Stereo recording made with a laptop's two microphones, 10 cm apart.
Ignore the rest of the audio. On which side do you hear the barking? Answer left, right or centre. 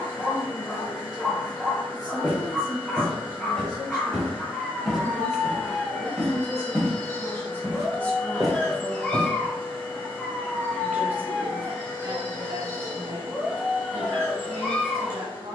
centre.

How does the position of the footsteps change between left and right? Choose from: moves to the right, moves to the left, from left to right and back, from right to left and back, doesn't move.
moves to the right.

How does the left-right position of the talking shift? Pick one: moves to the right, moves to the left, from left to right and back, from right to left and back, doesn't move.
moves to the right.